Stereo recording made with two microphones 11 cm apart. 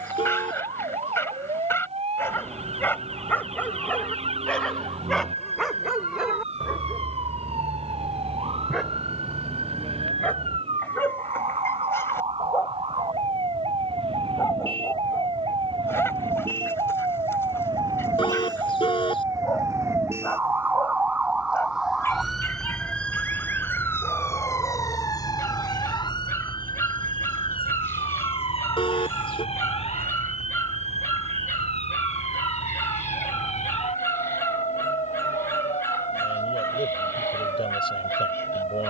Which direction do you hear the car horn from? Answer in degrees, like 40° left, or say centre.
50° left.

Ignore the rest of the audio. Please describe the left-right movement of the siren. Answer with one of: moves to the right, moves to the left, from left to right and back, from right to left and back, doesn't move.
moves to the left.